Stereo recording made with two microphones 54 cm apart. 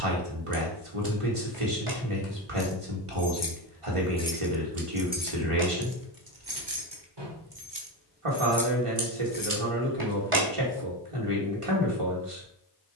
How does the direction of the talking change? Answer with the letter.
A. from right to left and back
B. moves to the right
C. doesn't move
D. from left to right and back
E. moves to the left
C.